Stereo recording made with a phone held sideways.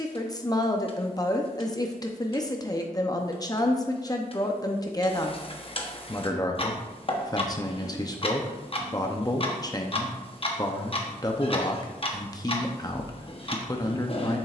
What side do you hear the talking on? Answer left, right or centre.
left.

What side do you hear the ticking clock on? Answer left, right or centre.
left.